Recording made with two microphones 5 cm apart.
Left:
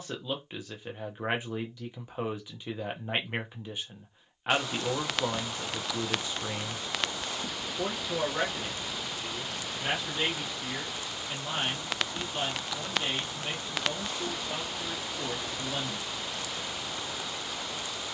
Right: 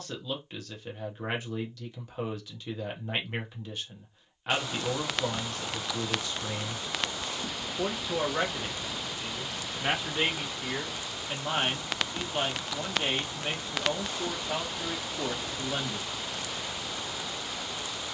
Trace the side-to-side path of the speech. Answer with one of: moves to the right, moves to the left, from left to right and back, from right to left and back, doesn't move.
moves to the right.